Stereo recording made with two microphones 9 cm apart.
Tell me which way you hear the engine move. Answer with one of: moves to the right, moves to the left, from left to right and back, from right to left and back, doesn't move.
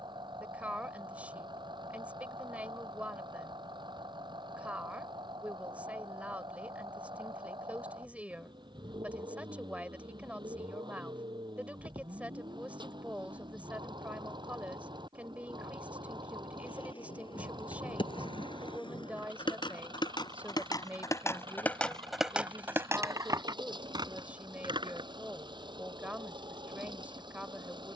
doesn't move.